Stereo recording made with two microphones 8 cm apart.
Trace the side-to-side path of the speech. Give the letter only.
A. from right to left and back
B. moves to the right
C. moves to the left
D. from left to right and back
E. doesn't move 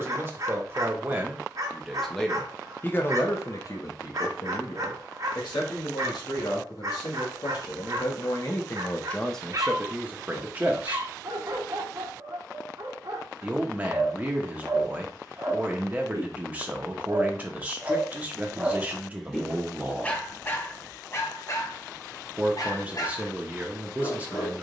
A.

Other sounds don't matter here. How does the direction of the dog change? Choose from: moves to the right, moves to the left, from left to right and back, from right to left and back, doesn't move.
moves to the left.